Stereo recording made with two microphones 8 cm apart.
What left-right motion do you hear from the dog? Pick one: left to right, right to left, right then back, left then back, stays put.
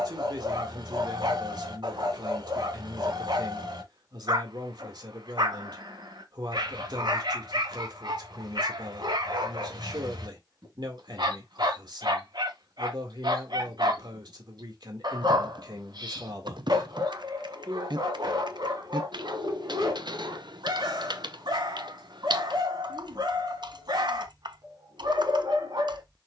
stays put.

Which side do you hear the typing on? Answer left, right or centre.
right.